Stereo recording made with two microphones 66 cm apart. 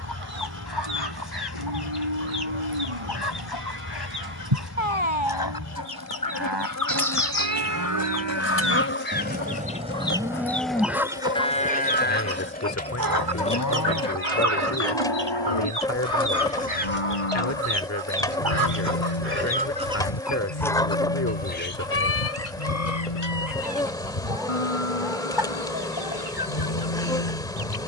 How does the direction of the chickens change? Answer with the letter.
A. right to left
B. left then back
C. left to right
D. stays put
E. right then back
E.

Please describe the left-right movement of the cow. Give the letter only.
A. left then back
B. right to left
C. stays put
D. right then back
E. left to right
B.